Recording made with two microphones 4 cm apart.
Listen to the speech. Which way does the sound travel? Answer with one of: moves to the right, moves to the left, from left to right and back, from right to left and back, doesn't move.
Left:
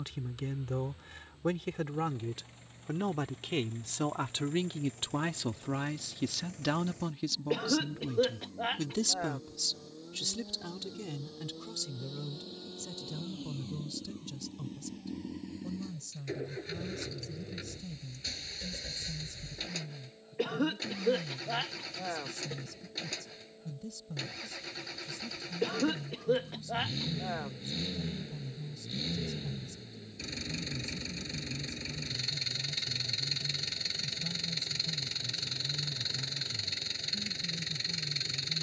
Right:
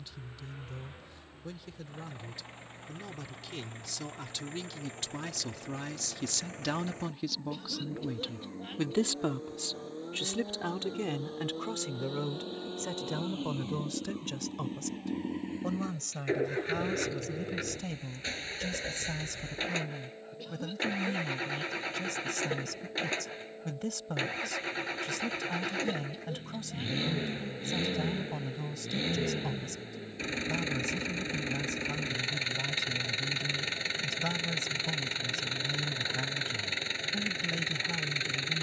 moves to the right.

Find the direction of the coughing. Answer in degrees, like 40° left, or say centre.
70° left.